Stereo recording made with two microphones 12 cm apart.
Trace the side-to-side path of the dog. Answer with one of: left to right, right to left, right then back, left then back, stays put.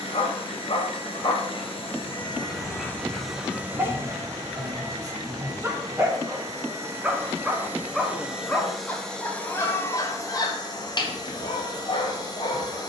right then back.